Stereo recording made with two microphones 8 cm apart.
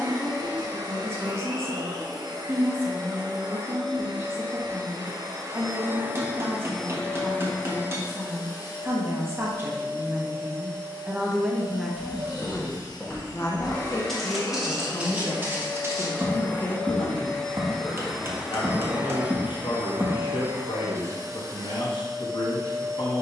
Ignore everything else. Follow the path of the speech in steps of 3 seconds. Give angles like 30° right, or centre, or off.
30° right, 30° right, 30° right, 20° right, 30° left, 70° left, 70° left, 70° left.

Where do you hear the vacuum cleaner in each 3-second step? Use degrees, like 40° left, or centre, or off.
50° right, 50° right, 20° left, 50° left, 40° left, 20° left, 20° right, 40° right.